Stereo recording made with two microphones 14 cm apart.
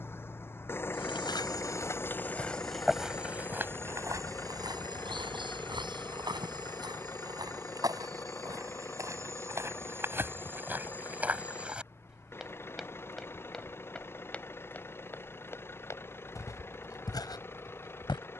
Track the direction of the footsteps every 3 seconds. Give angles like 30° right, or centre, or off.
20° left, 20° right, 30° right, 10° right, centre, 20° left.